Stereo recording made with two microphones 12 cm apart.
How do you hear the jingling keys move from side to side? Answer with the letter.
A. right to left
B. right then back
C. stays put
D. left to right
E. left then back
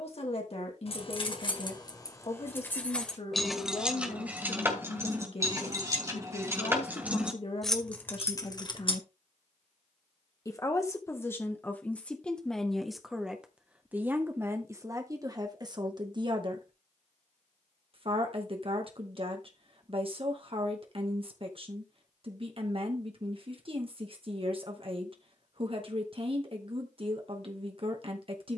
B.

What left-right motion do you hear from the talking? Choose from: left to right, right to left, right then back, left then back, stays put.
left to right.